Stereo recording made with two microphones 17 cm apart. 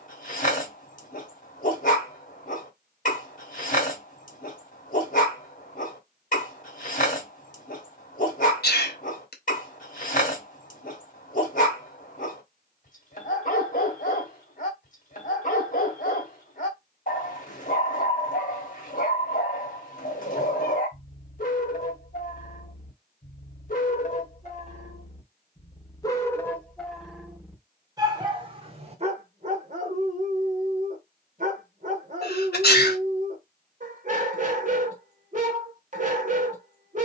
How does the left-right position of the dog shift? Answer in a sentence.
In this clip you hear the dog move to the right.